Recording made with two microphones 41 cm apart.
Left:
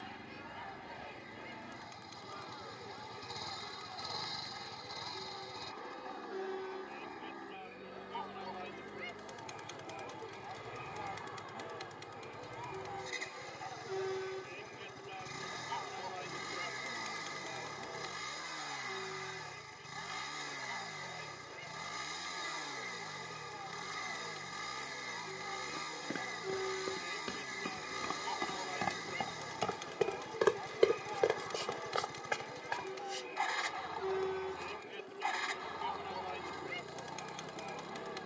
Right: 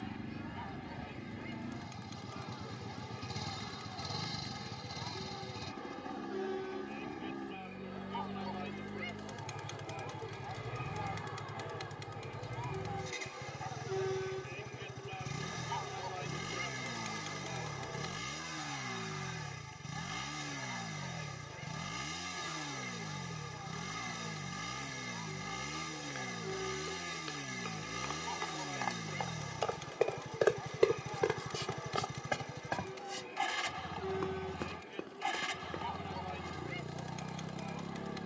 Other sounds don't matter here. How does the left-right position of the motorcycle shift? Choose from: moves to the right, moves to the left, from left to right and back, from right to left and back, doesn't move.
doesn't move.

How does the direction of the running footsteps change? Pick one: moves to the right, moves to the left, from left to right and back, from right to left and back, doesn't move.
moves to the right.